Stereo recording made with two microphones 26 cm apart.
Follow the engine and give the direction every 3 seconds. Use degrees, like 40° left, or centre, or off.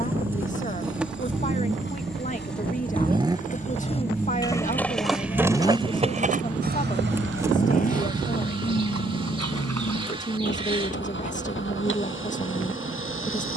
40° right, centre, 30° left, 50° left, 50° left.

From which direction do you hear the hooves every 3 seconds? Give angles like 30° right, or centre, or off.
50° left, 10° left, 50° right, 70° right, off.